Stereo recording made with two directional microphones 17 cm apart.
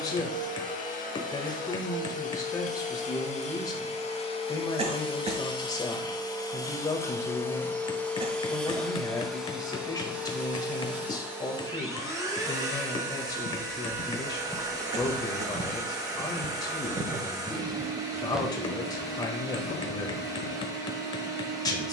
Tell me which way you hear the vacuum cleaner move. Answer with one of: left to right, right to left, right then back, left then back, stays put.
left to right.